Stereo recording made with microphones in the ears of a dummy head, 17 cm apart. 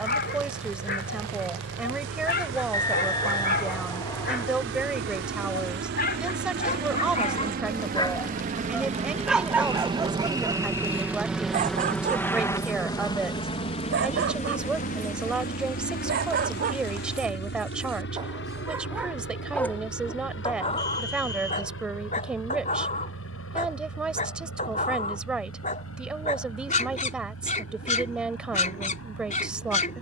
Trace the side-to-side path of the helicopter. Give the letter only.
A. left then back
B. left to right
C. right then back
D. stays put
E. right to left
E.